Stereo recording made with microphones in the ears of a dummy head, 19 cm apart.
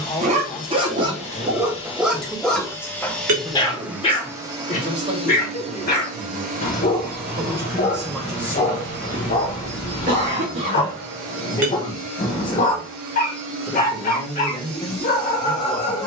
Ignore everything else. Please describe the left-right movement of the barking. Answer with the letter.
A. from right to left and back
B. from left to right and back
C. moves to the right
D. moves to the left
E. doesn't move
D.